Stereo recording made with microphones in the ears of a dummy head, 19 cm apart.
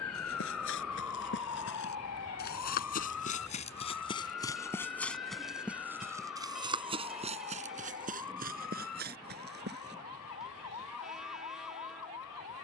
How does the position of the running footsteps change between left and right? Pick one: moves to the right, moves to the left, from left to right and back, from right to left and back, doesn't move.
moves to the right.